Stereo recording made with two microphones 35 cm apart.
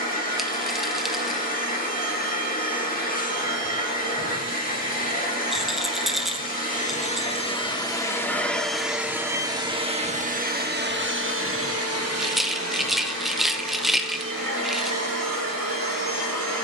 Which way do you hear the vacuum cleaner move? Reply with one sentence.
In this clip you hear the vacuum cleaner move to the right.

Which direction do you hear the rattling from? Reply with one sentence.
You can hear the rattling in the centre.